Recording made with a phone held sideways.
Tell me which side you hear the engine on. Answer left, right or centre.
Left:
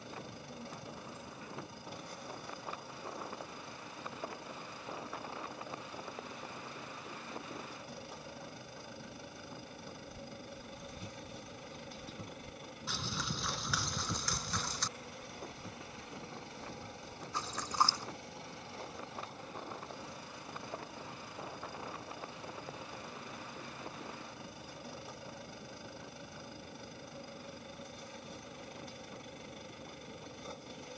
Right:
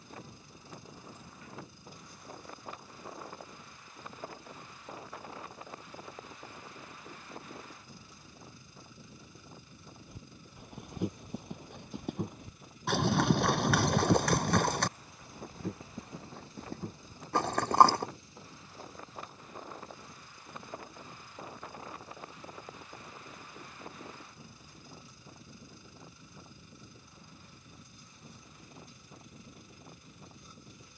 left.